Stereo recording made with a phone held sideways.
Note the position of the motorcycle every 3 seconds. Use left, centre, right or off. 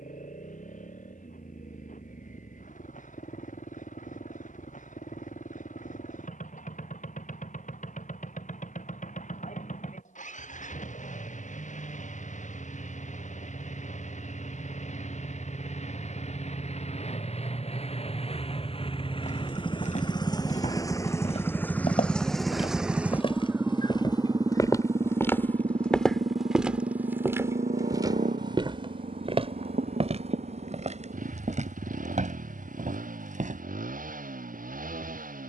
left, left, left, left, left, left, left, centre, right, right, right, right.